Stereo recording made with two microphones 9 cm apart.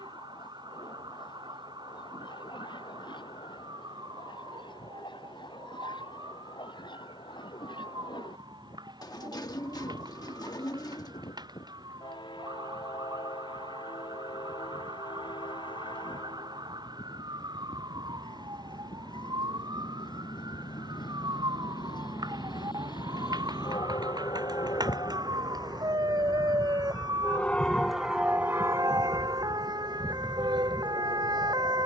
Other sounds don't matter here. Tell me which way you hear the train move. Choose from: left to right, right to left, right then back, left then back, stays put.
left to right.